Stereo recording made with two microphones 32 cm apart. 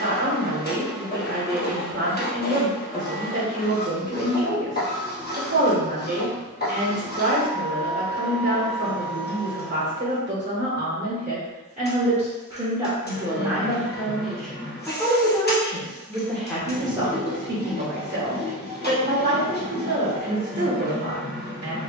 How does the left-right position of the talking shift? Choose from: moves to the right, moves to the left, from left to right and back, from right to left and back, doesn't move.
from right to left and back.